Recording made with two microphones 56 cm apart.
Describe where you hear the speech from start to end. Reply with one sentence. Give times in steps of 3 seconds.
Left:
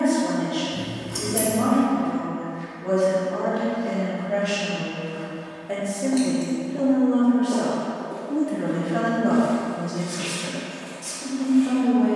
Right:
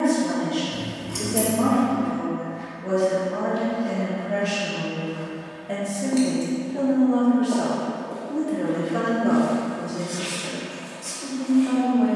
In this clip you hear the speech on the right from 0 s, in the centre from 6 s and on the left from 9 s.